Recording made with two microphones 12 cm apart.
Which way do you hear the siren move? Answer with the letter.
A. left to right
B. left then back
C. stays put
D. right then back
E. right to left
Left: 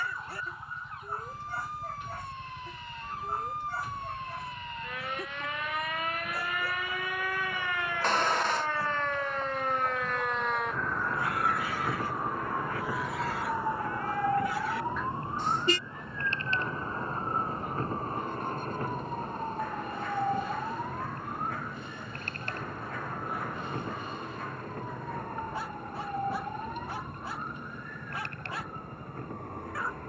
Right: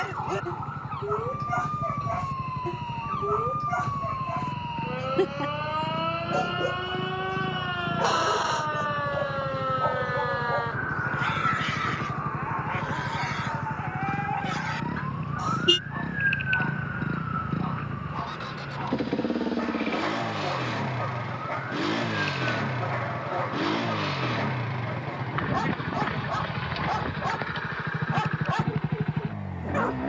E.